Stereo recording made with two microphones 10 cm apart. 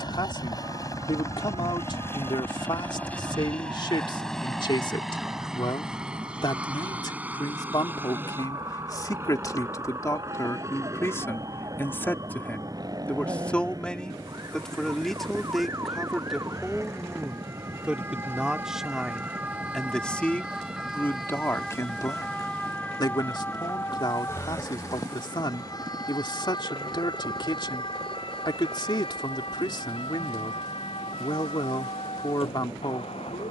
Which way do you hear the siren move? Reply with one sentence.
In this clip you hear the siren move to the left.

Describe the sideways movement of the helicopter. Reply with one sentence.
You can hear the helicopter move from left to right.